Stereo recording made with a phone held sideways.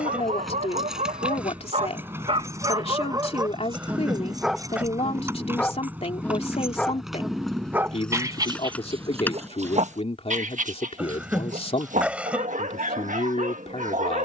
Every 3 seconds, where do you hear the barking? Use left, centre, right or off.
right, centre, centre, right, right.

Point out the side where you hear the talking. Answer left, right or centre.
left.